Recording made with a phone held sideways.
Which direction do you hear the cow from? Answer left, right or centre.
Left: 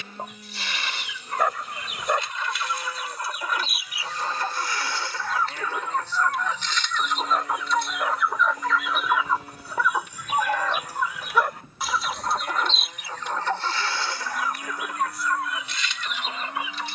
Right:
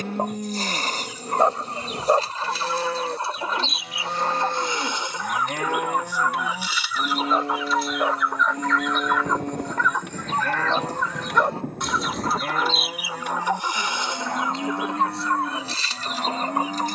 right.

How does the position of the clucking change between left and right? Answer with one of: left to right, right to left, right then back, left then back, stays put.
left then back.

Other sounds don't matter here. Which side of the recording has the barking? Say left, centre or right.
right.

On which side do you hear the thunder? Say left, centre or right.
right.